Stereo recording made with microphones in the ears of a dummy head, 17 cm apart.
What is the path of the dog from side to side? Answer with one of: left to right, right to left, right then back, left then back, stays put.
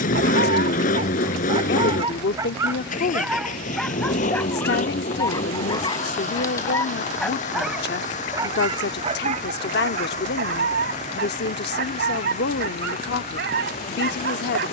left then back.